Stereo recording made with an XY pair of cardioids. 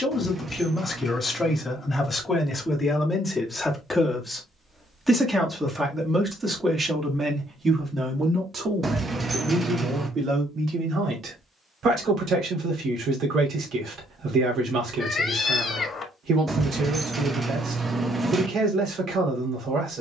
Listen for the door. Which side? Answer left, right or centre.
right.